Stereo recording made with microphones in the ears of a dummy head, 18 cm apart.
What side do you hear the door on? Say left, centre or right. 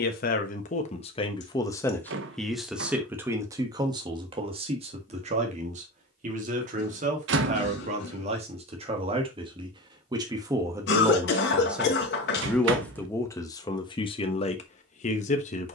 right.